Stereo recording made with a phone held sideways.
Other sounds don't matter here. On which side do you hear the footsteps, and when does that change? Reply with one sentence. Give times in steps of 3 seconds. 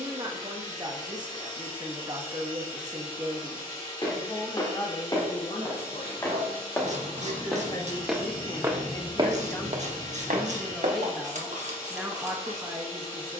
You can hear the footsteps not at all from 0 s, on the left from 3 s, in the centre from 6 s, on the right from 9 s and not at all from 12 s.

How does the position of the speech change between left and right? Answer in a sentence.
In this clip you hear the speech move from right to left and back again.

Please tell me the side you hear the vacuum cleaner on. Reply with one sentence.
In this clip you hear the vacuum cleaner on the left.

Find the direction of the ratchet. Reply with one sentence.
You can hear the ratchet on the right.